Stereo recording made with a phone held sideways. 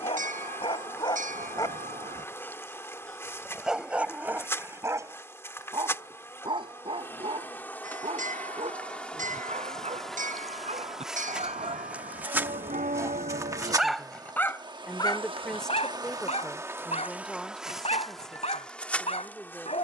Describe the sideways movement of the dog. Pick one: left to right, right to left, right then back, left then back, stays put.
right then back.